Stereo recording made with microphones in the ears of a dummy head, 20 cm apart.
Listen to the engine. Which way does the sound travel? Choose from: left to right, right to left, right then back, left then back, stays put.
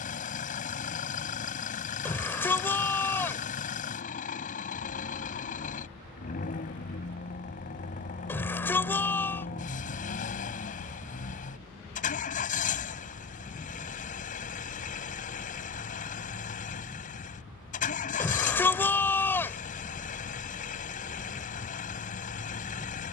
stays put.